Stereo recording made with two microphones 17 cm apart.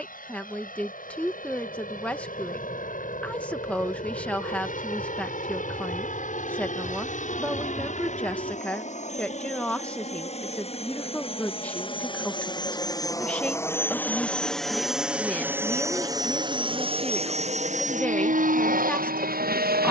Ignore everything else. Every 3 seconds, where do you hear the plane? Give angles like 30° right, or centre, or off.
60° left, 60° left, 50° left, 40° left, 20° left, 30° right, 50° right.